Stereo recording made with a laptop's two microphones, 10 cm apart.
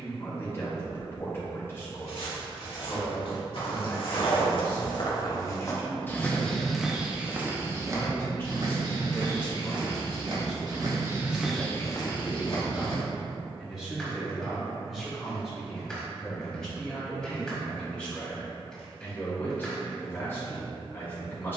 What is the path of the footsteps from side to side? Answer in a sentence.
You can hear the footsteps move from left to right and back again.